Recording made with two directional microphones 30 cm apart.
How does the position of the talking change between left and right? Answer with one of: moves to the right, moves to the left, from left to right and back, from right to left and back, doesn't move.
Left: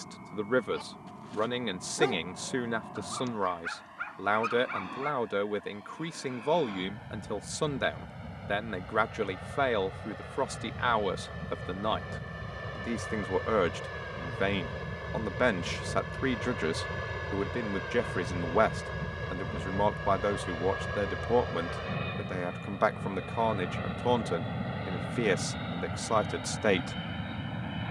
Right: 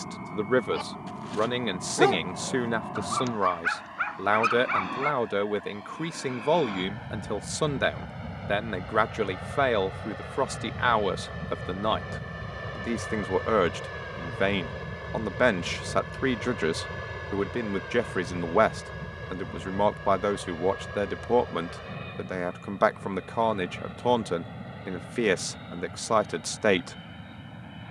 doesn't move.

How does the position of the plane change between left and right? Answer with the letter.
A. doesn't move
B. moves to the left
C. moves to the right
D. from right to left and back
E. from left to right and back
B.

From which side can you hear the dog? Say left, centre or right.
right.